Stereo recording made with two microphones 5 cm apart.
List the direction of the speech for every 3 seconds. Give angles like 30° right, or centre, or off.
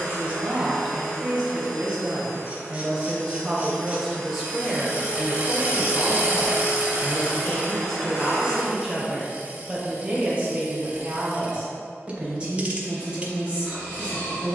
20° right, centre, 10° left, 20° right, 20° right.